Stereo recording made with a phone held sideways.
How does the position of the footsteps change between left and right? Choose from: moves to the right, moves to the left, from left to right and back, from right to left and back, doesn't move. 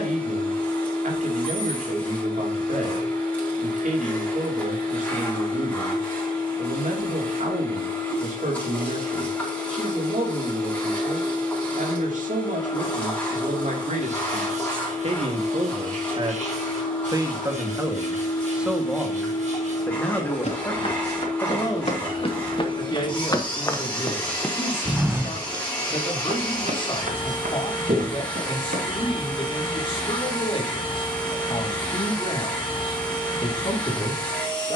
moves to the right.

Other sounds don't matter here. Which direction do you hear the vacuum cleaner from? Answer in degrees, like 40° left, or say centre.
10° left.